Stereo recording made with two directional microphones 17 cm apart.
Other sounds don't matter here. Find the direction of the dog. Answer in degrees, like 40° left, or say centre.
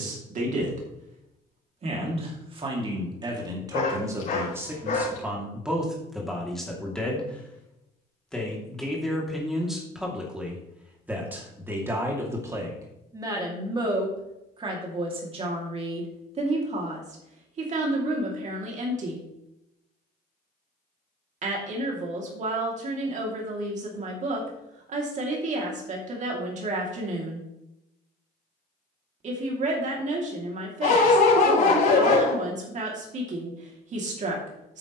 50° left.